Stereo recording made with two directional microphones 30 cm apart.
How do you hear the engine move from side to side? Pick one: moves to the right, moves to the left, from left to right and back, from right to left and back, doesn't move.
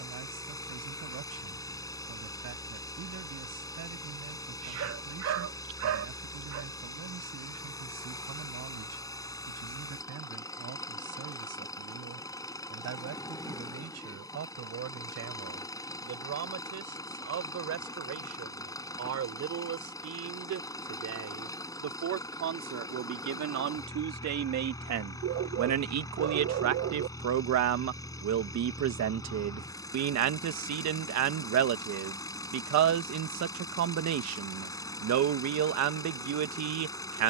doesn't move.